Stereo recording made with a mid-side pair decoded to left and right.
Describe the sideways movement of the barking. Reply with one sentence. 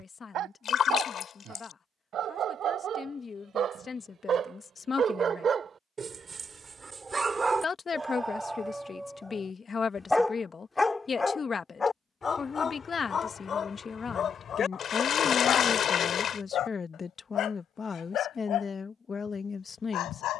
In this clip you hear the barking move from right to left.